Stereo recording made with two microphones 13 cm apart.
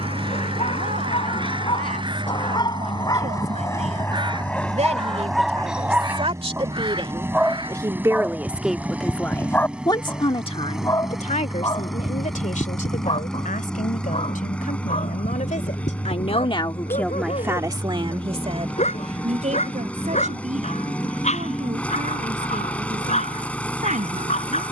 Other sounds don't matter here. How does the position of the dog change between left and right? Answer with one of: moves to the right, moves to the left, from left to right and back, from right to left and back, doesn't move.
from left to right and back.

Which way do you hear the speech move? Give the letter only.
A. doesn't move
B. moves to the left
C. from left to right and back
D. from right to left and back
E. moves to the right
D.